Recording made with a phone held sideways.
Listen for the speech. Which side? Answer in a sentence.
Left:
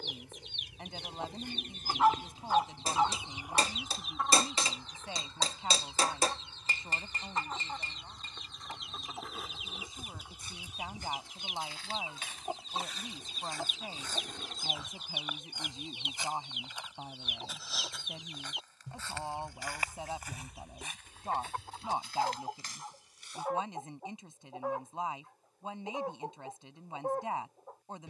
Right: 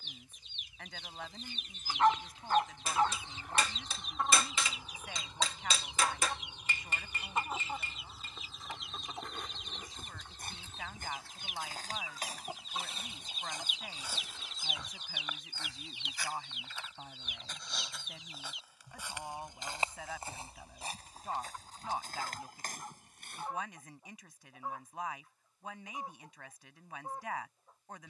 You can hear the speech on the left.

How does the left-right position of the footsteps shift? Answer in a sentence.
In this clip you hear the footsteps go left and come back.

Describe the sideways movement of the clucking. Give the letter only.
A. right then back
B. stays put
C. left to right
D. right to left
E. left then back
A.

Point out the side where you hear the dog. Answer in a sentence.
In this clip you hear the dog in the centre.